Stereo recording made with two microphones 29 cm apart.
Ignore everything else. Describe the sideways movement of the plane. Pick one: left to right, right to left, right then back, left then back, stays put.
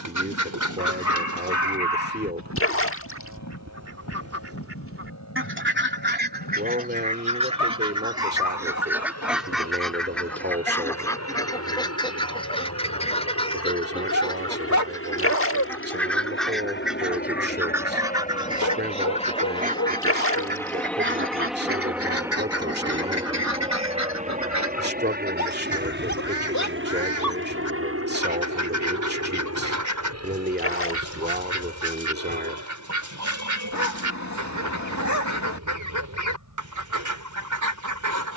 left to right.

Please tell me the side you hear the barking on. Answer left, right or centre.
left.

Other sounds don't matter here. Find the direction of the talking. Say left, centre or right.
right.